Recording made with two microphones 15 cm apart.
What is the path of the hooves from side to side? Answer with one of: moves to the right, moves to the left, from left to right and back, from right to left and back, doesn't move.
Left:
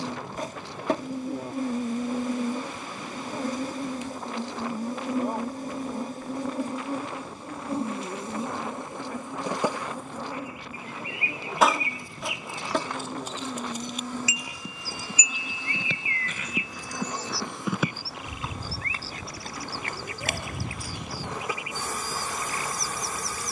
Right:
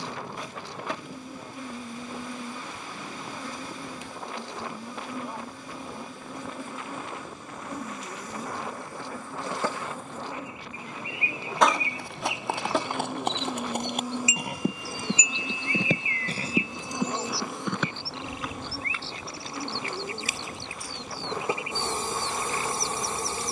moves to the left.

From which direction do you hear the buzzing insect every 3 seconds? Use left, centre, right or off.
left, left, left, centre, centre, right, right, right.